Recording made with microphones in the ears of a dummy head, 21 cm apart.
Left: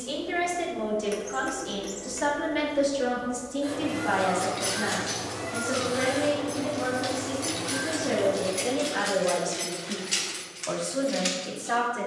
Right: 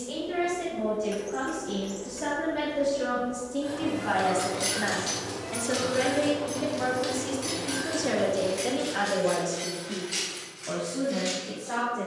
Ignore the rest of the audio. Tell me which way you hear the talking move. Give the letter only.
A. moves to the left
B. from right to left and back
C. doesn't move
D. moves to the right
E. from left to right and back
E.